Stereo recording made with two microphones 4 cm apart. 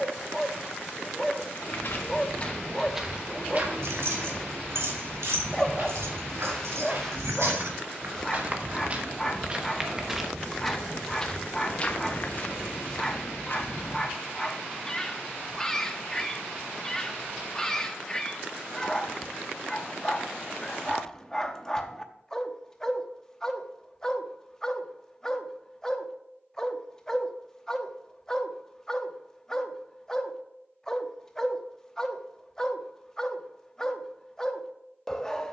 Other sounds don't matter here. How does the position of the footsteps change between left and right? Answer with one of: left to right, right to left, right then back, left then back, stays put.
right then back.